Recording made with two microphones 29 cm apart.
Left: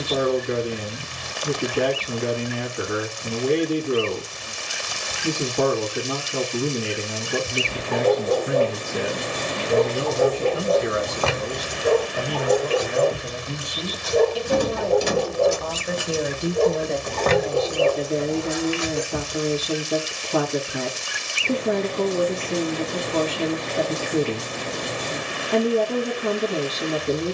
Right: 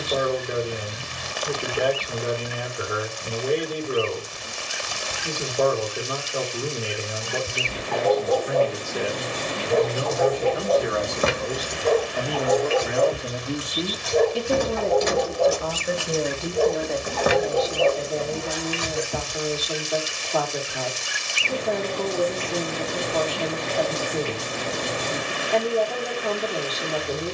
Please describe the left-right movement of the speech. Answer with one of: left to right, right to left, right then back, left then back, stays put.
right then back.